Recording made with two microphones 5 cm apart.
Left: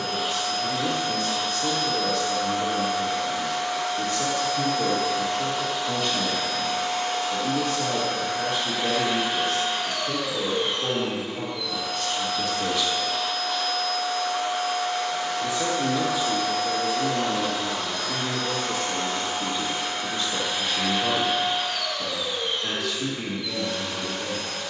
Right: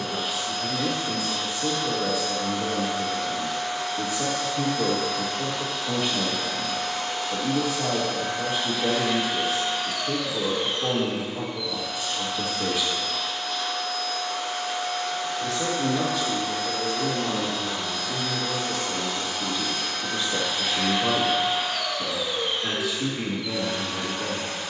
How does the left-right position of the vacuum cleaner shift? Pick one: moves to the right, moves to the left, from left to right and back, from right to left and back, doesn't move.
moves to the right.